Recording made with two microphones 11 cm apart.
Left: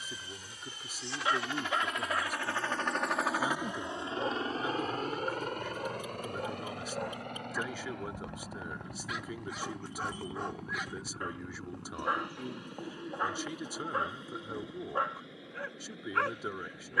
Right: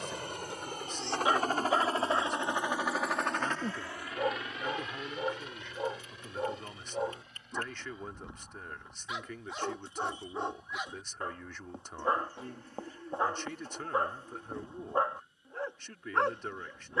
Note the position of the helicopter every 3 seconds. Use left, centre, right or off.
right, left, left, left, left, left.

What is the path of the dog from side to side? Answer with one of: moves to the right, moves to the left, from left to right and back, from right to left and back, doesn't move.
doesn't move.